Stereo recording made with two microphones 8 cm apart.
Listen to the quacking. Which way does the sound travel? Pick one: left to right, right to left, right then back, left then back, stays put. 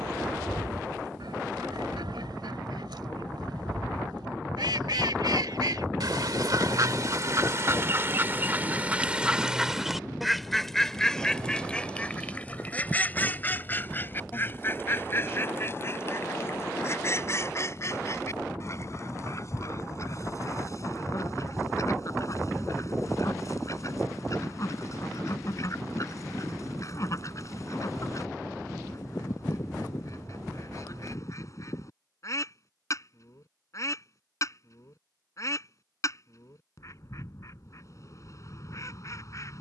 right to left.